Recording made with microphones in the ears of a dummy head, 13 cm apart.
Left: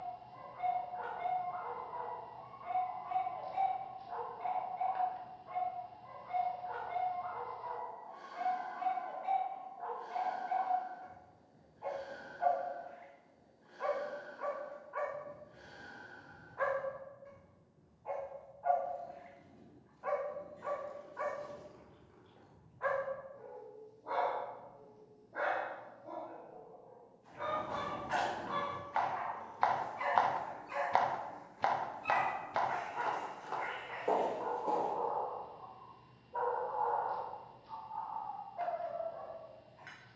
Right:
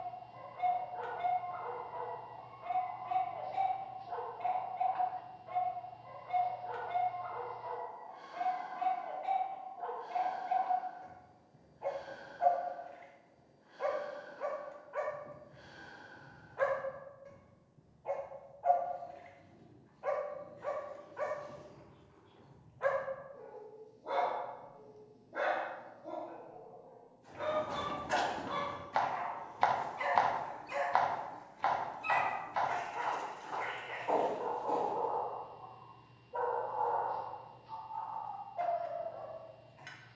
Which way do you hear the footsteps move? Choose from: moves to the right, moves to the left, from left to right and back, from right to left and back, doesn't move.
moves to the left.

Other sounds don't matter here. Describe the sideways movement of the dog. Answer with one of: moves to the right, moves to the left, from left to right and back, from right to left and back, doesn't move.
doesn't move.